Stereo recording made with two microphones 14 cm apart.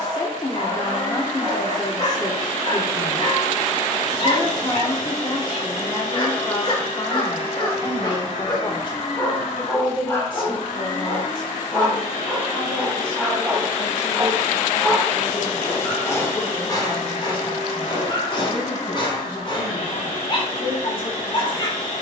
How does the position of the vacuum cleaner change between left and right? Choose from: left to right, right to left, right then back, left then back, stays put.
stays put.